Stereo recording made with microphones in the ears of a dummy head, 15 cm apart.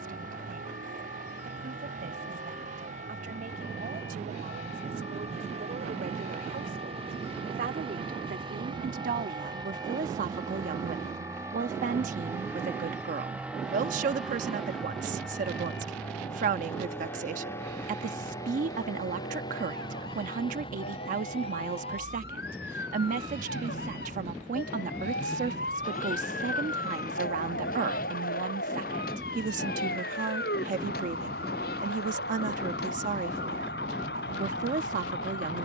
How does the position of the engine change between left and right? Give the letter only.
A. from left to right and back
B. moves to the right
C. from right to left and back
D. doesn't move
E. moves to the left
E.